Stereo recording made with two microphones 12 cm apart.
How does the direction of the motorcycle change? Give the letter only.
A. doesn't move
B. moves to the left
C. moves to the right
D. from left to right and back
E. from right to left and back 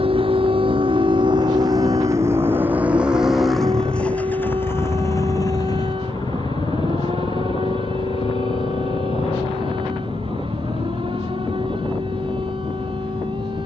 B.